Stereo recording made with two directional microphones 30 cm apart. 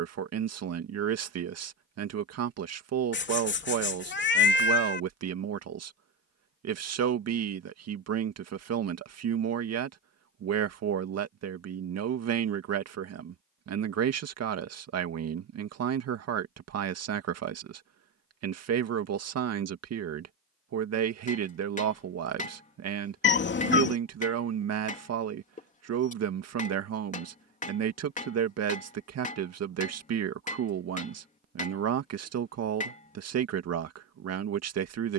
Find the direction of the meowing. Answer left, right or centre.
left.